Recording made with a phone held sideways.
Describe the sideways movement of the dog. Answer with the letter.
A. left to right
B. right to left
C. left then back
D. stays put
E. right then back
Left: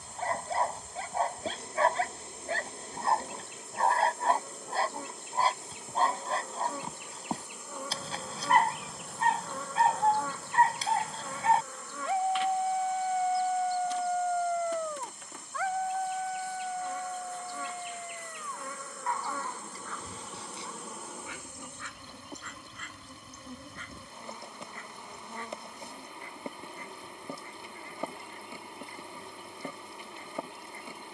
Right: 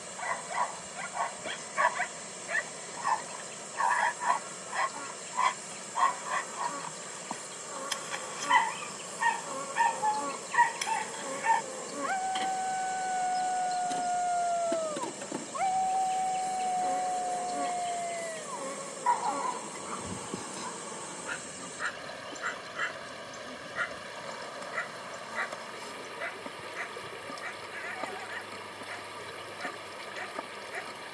A.